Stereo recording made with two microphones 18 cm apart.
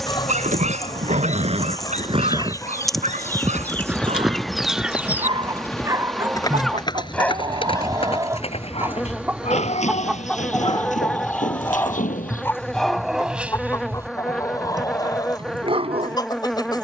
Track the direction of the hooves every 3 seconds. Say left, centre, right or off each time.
right, centre, left, left, left, off.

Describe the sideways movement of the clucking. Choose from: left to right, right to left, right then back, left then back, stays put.
right then back.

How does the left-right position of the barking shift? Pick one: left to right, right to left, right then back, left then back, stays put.
left then back.